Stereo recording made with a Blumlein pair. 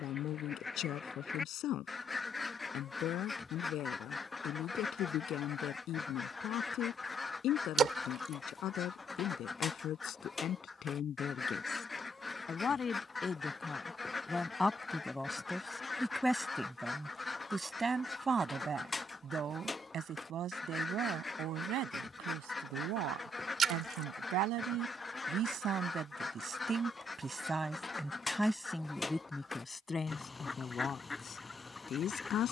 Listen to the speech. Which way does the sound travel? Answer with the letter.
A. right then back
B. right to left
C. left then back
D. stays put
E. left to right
A.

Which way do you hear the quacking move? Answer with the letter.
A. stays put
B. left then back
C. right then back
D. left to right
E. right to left
A.